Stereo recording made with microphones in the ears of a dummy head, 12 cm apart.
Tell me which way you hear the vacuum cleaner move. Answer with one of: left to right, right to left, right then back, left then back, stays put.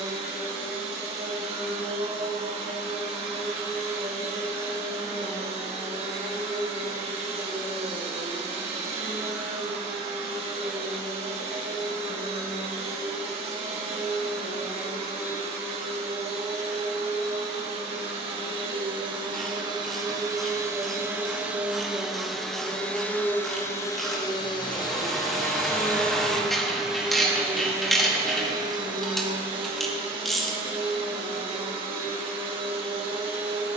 left then back.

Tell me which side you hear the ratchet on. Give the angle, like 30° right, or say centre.
centre.